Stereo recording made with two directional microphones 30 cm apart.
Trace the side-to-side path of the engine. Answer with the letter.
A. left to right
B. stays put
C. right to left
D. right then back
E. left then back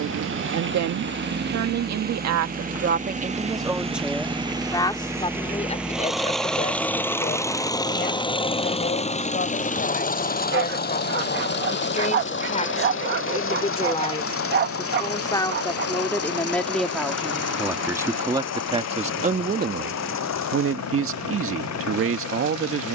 C.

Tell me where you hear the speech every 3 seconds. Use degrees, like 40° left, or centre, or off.
60° right, centre, 30° left, 30° left, 20° left, centre, 30° right, 50° right.